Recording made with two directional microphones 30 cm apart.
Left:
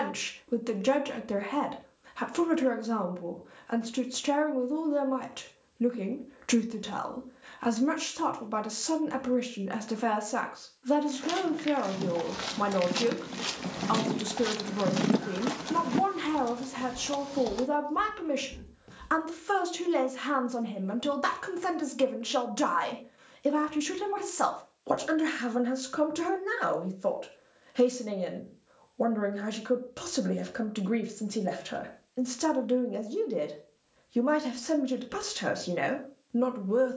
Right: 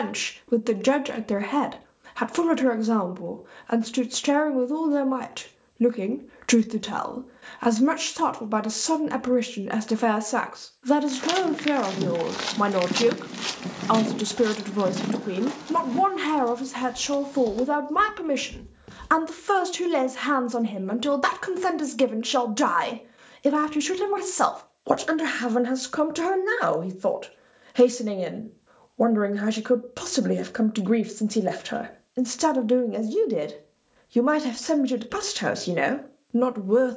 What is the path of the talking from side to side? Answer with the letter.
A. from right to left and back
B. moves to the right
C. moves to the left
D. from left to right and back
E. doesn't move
E.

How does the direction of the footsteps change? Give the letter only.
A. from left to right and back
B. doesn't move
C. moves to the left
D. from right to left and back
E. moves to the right
D.